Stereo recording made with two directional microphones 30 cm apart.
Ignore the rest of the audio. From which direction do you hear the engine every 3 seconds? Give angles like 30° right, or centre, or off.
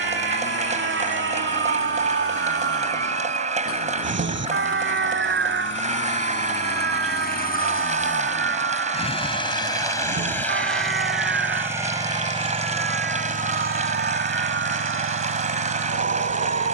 50° left, 40° left, 30° left, centre, 30° right, 50° right.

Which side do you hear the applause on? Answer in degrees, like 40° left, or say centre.
20° right.